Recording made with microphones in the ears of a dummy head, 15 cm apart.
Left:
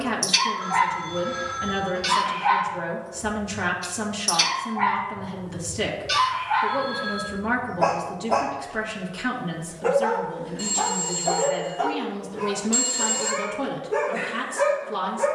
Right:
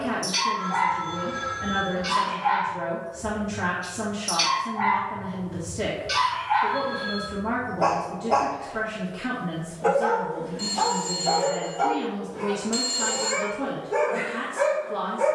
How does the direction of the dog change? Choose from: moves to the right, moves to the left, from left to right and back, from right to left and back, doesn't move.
moves to the right.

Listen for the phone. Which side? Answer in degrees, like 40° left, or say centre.
10° left.